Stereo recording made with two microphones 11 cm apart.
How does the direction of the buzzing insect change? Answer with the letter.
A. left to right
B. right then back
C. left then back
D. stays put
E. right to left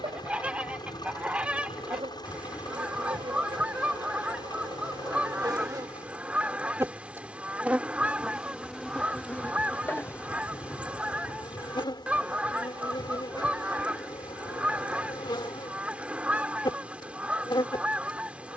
E.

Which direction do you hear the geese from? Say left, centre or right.
centre.